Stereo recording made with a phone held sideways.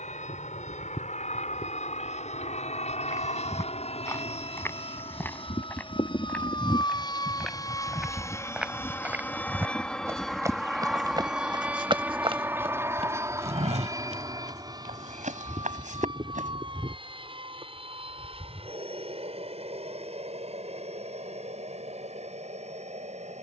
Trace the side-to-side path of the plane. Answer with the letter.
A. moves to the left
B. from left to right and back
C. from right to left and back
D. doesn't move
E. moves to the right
E.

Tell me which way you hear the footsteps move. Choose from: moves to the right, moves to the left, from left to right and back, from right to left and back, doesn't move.
moves to the right.